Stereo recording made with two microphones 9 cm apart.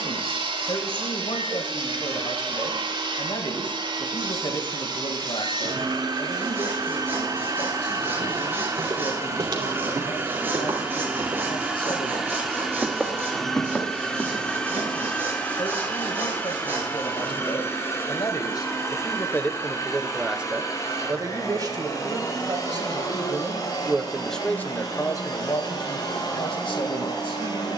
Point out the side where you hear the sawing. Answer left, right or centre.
right.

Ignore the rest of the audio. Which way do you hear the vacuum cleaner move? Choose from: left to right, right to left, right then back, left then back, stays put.
right to left.